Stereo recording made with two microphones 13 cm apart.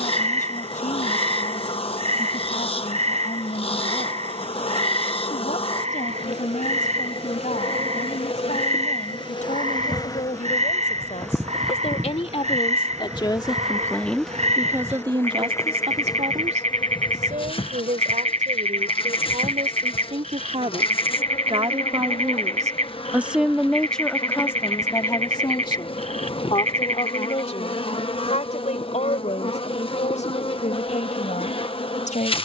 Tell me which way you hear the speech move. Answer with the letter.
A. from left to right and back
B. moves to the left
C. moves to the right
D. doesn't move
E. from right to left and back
A.